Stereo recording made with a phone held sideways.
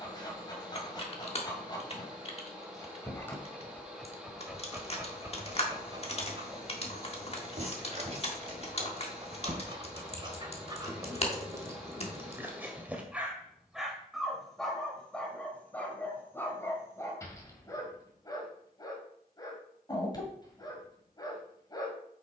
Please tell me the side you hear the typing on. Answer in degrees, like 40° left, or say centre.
40° left.